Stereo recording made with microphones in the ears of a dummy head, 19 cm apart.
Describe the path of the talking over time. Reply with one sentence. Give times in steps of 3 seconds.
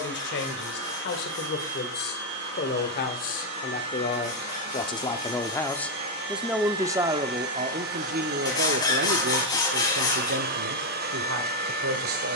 In this clip you hear the talking on the left from 0 s and on the right from 6 s.